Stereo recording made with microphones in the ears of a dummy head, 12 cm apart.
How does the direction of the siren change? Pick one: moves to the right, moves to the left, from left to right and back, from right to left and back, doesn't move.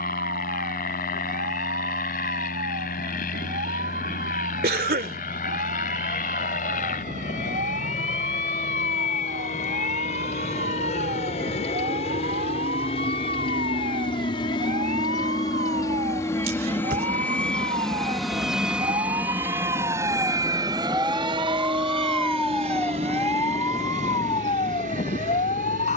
moves to the left.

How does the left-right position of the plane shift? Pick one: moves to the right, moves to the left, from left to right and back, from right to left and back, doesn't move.
moves to the right.